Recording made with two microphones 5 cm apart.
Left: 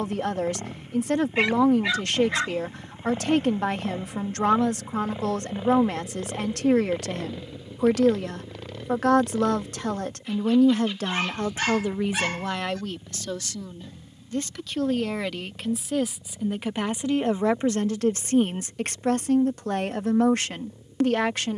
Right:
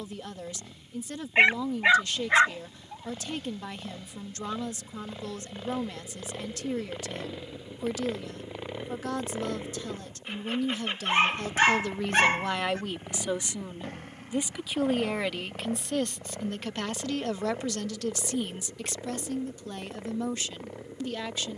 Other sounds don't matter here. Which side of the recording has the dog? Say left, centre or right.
right.